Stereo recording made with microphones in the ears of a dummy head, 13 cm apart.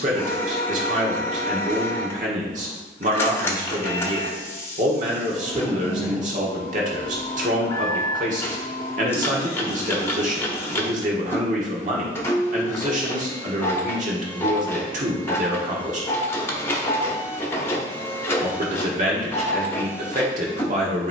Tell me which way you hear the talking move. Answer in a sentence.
In this clip you hear the talking stay in one place.